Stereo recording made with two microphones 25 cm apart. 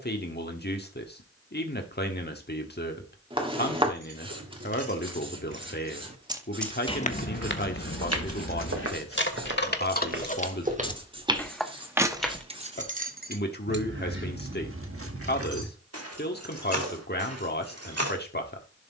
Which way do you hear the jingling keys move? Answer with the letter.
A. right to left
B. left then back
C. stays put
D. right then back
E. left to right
B.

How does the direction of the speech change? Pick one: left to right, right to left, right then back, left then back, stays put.
stays put.